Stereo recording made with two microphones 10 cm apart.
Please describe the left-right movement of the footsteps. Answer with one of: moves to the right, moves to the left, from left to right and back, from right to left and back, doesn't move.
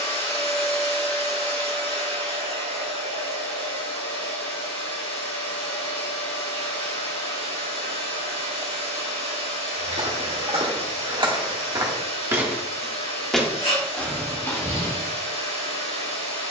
moves to the left.